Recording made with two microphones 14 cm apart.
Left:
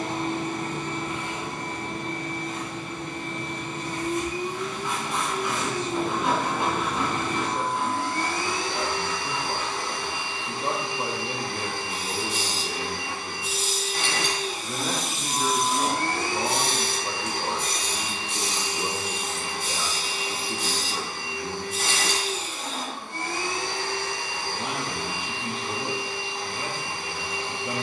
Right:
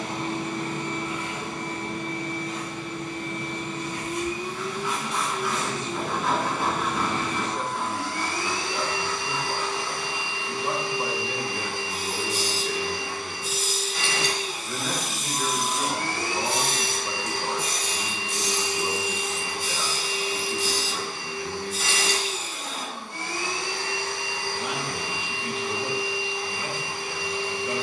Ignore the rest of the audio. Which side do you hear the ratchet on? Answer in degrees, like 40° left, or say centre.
70° left.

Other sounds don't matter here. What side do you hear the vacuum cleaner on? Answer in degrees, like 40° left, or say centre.
50° left.